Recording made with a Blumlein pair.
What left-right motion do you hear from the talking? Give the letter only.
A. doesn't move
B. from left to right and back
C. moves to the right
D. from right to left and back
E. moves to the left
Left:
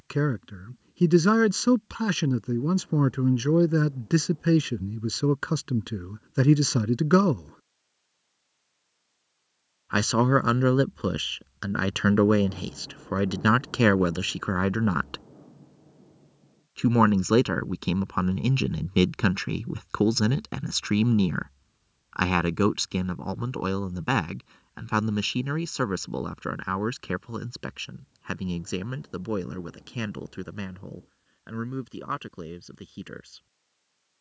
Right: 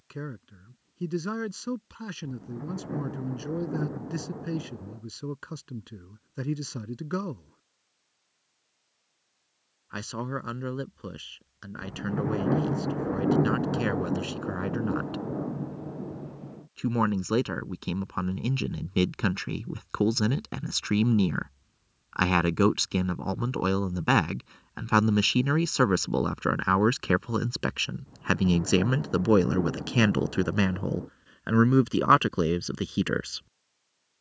C.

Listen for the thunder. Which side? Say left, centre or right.
right.